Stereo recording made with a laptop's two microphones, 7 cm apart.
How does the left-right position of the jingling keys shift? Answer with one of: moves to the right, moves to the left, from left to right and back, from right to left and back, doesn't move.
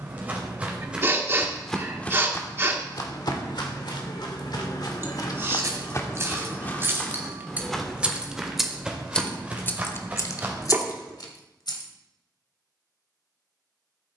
moves to the left.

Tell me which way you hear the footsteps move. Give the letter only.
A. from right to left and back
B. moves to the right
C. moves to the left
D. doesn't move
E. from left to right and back
A.